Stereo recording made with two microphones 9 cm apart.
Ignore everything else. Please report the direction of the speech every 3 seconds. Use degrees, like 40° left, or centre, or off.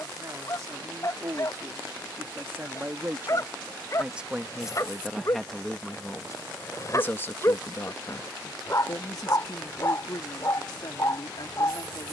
40° right, 10° right, 30° left, 60° left.